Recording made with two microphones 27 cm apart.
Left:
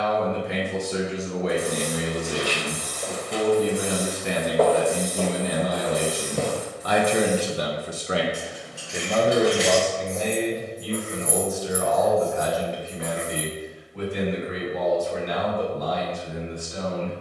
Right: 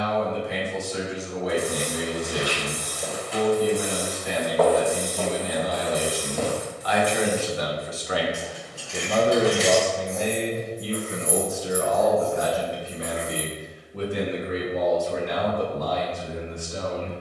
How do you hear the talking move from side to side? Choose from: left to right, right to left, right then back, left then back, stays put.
left to right.